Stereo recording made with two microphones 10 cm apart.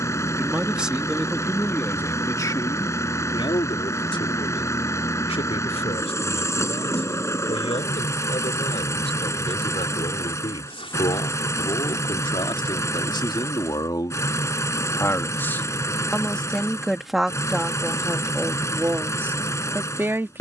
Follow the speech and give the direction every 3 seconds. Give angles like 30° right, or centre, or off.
10° left, 60° left, 70° left, 60° left, 40° left, 10° left, 20° right.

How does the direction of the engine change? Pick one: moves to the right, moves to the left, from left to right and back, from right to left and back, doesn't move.
doesn't move.